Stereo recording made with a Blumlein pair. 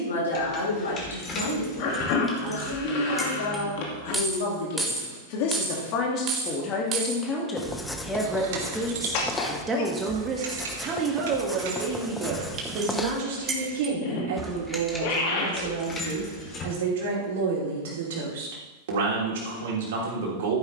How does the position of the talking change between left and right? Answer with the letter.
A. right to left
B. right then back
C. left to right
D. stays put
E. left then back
C.